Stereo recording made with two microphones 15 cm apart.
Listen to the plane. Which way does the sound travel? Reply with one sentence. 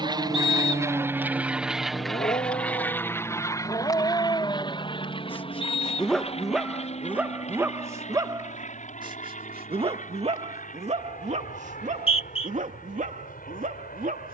In this clip you hear the plane go from the right side to the left.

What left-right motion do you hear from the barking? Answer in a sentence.
In this clip you hear the barking move to the right.